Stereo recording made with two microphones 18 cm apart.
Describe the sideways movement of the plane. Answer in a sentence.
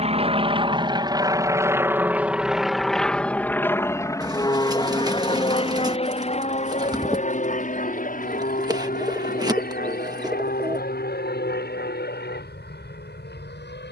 In this clip you hear the plane travel towards the left.